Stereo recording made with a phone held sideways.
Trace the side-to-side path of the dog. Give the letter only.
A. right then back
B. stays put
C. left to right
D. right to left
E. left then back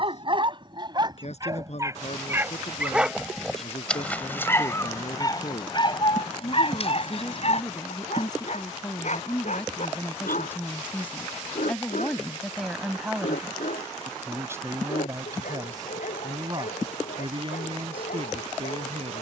D.